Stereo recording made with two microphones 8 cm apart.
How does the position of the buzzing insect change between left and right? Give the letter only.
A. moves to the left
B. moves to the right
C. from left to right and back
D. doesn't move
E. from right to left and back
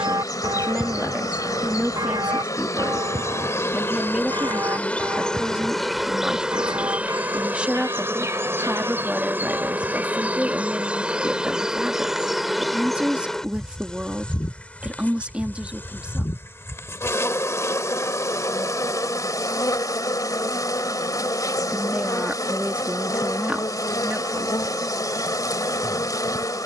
C.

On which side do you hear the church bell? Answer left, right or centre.
right.